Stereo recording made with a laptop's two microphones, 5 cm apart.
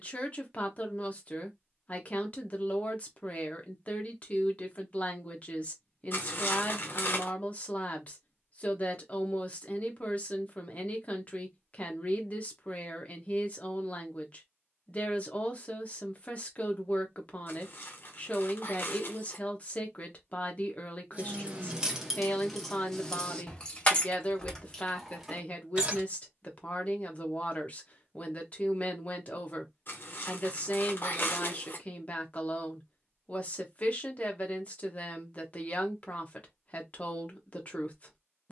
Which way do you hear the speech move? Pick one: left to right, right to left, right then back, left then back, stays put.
stays put.